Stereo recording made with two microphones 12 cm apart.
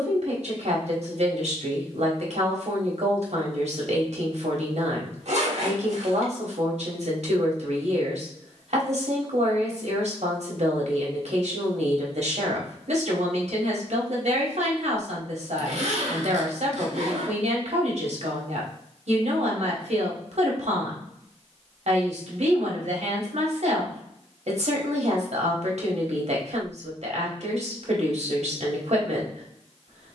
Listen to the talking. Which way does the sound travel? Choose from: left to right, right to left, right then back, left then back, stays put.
stays put.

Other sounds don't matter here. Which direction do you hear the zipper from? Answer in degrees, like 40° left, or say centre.
70° right.